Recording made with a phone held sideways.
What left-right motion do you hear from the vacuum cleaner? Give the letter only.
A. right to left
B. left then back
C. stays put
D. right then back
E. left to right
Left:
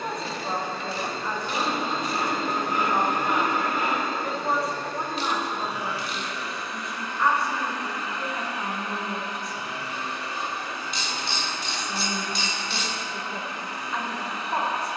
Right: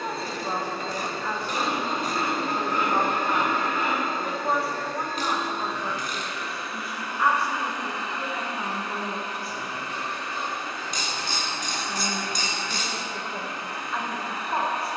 E.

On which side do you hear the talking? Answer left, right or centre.
centre.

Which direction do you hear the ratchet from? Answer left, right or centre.
right.